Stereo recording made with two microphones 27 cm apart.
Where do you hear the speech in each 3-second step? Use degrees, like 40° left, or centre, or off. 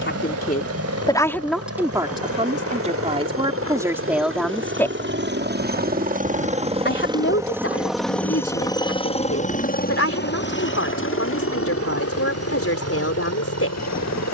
centre, 10° right, 50° left, 60° left, 60° left.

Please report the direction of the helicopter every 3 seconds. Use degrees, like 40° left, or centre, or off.
60° right, 50° right, 10° right, 40° left, 60° left.